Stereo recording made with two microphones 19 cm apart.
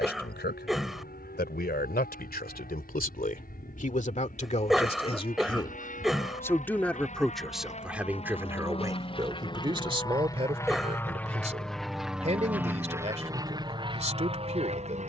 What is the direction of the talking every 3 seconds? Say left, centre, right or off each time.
left, left, centre, right, right.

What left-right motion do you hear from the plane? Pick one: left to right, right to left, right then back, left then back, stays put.
left to right.